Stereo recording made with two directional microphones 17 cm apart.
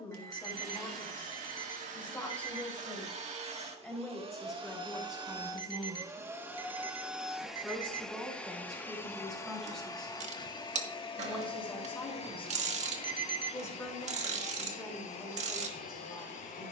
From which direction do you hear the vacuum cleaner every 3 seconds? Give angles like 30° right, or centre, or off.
50° right, 30° right, centre, 30° left, 40° left, 50° left.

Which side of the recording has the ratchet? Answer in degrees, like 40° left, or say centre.
40° right.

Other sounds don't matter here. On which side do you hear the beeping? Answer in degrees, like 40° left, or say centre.
30° right.